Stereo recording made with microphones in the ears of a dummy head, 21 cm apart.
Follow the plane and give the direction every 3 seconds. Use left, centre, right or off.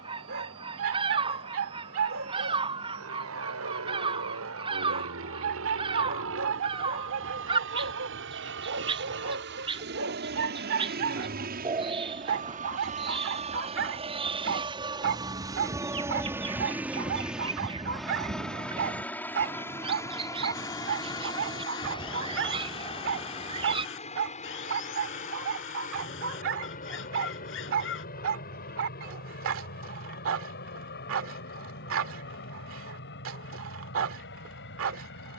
right, right, right, right, right, centre, centre, left, left, left, left, left.